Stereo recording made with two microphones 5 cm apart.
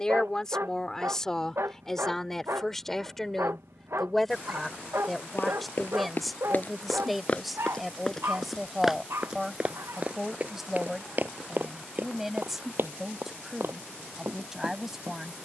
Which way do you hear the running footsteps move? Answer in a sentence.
In this clip you hear the running footsteps travel towards the right.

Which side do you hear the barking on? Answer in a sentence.
In this clip you hear the barking on the right.